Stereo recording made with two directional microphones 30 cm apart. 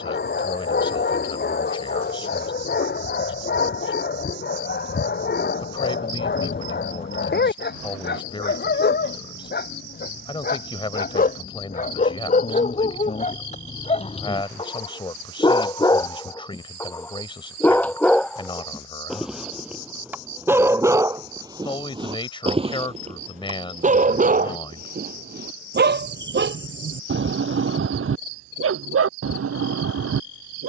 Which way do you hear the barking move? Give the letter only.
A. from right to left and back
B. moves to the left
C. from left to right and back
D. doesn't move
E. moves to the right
E.